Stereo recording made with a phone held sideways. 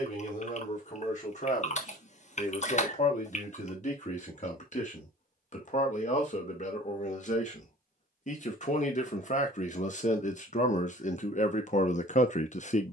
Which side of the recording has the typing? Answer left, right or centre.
left.